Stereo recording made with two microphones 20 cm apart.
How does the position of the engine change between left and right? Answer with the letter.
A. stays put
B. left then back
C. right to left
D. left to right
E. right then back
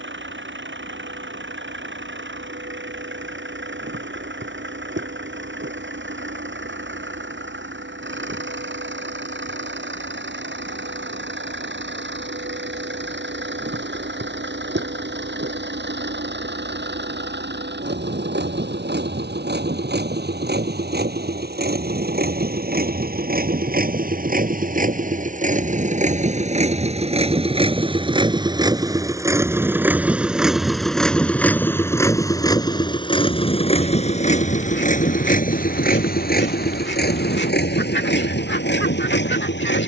C.